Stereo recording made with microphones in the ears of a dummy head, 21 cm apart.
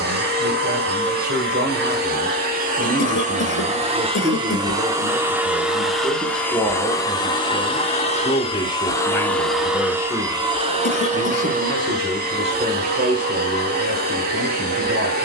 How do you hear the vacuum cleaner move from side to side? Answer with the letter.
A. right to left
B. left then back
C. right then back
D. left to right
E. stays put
B.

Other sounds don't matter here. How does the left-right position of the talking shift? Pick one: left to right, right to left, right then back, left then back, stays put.
left then back.